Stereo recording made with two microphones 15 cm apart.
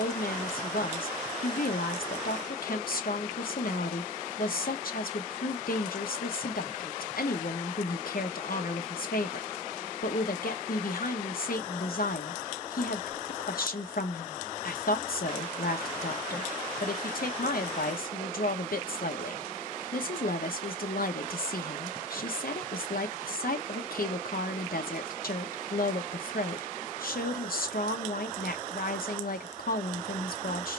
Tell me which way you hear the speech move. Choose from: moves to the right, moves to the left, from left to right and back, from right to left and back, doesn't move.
doesn't move.